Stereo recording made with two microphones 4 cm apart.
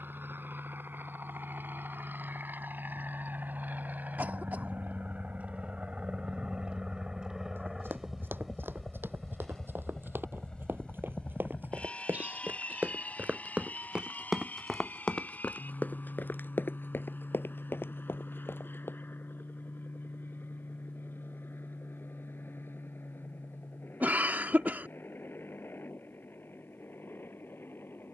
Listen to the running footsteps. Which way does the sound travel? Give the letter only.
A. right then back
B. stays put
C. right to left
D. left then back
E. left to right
C.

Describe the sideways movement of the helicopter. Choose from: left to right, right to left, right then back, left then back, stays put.
right to left.